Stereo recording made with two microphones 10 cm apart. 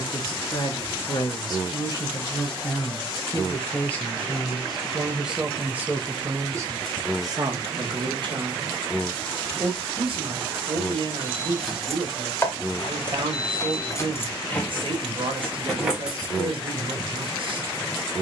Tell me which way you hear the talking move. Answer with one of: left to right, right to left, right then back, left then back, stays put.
left to right.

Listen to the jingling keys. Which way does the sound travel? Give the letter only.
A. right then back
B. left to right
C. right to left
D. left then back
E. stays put
D.